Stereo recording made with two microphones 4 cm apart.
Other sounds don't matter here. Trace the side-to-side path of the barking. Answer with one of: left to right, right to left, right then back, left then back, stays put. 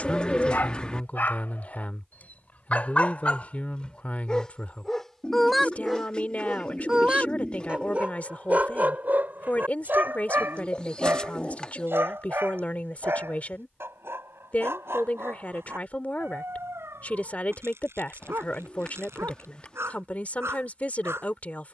left to right.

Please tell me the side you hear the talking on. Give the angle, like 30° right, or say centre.
40° left.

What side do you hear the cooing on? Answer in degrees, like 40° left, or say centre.
20° left.